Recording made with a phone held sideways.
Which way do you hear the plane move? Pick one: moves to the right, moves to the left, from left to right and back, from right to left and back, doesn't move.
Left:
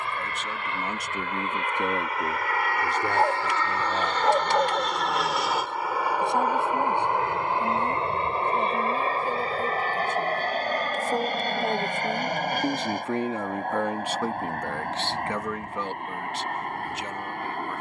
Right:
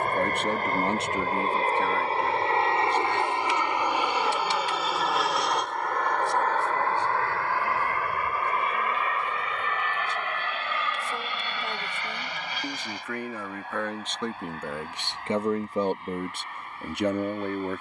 moves to the left.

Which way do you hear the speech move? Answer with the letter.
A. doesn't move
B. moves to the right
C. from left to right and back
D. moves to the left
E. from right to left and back
E.